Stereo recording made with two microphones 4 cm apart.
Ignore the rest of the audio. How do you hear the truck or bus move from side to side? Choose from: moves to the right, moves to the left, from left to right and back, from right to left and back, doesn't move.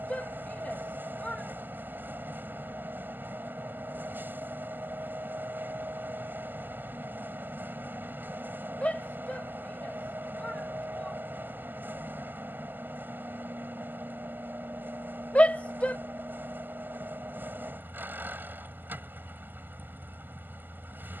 doesn't move.